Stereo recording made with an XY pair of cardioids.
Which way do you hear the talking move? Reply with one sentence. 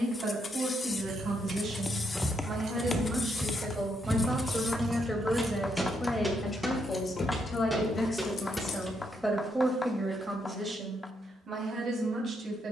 You can hear the talking move from right to left and back again.